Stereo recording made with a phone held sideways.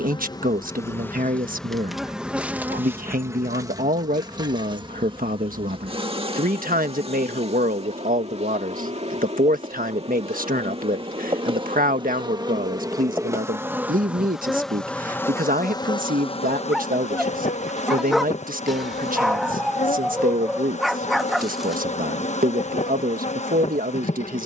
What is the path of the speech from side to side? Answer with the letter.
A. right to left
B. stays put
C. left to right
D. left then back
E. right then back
B.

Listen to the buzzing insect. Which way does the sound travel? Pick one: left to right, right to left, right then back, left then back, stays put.
right then back.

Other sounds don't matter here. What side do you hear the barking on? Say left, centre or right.
centre.